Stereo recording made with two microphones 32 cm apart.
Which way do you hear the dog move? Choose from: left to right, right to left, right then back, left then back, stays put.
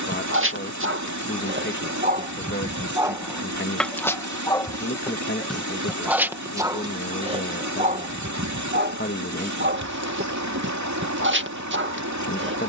left then back.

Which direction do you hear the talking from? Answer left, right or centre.
left.